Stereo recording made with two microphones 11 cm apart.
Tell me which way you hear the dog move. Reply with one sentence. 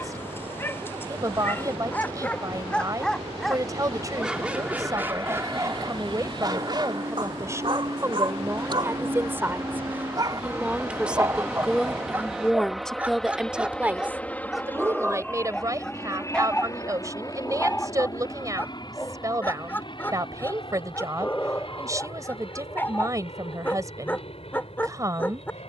In this clip you hear the dog go right and come back.